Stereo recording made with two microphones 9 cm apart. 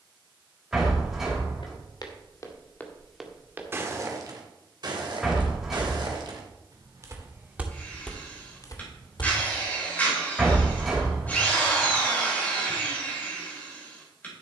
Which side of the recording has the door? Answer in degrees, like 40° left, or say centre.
centre.